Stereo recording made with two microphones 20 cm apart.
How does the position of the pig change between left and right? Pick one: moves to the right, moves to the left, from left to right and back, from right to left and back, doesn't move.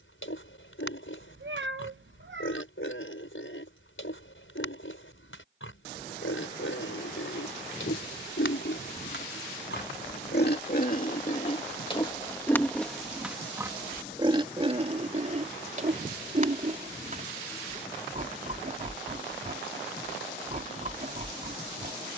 moves to the right.